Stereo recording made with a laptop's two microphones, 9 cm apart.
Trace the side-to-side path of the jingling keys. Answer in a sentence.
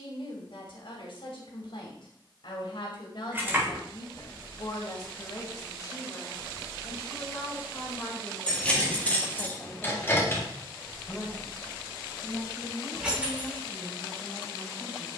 You can hear the jingling keys go left and come back.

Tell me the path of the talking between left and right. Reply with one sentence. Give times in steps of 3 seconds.
You can hear the talking on the left from 0 s and in the centre from 9 s.